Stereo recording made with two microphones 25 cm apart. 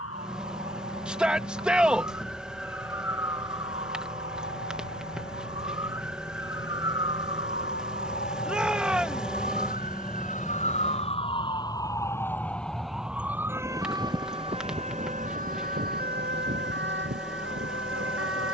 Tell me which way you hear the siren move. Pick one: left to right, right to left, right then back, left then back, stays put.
left to right.